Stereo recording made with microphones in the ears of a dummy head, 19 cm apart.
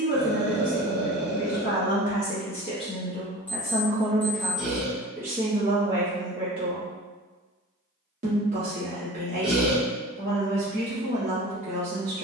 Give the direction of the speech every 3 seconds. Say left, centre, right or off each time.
left, centre, right, right.